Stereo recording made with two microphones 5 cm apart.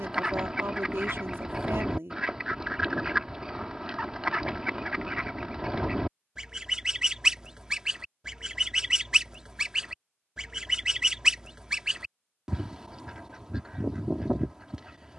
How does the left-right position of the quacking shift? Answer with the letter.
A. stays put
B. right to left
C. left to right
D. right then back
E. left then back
A.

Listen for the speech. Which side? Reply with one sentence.
In this clip you hear the speech on the right.